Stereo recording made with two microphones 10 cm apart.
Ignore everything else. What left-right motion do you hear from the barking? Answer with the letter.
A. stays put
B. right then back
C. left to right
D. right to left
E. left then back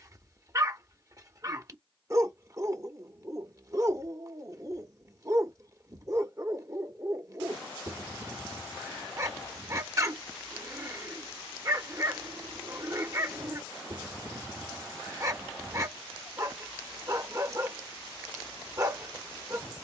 A.